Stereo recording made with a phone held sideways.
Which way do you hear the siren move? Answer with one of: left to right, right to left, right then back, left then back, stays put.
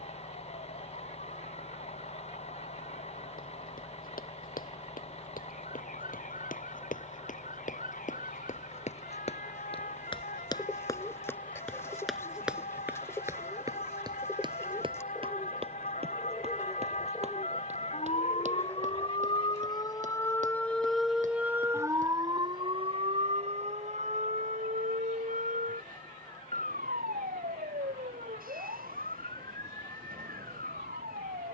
left to right.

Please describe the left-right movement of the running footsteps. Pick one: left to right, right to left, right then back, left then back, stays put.
left to right.